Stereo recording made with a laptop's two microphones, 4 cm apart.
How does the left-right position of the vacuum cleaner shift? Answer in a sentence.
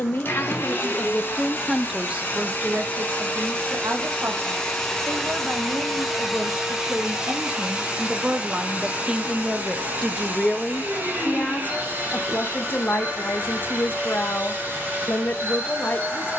You can hear the vacuum cleaner move to the right.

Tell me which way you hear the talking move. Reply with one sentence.
You can hear the talking go right and come back.